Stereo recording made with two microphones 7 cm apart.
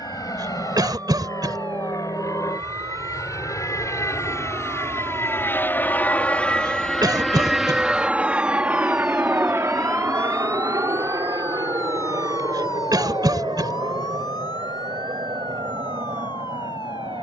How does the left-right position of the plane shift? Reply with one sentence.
In this clip you hear the plane move to the right.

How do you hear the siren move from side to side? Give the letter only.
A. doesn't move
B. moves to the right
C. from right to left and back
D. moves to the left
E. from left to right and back
D.